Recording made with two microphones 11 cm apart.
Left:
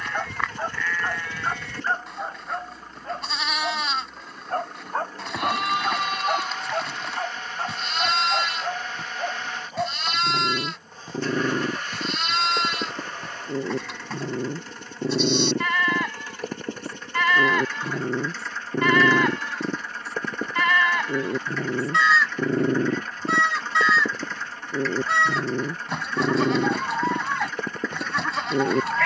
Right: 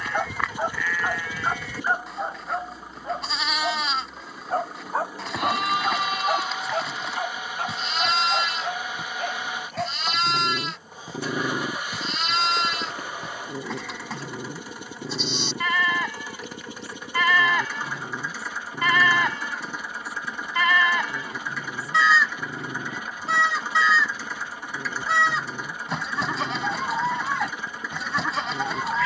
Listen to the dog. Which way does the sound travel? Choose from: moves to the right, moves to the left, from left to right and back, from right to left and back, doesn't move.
moves to the left.